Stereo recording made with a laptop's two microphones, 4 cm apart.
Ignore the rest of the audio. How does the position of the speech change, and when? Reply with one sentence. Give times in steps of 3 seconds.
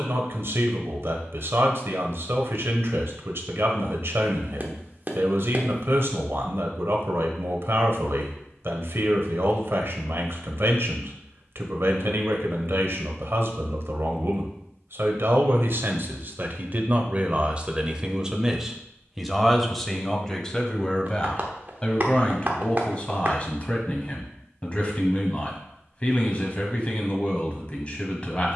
You can hear the speech on the right from 0 s, in the centre from 18 s and on the left from 21 s.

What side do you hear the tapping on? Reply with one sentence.
You can hear the tapping on the right.